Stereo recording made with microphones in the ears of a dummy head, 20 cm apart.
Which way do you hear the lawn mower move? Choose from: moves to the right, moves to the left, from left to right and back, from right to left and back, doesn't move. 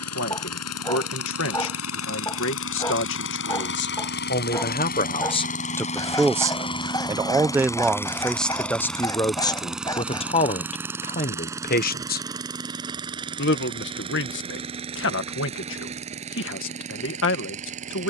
moves to the right.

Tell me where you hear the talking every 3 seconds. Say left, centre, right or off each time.
left, left, centre, left, left, left.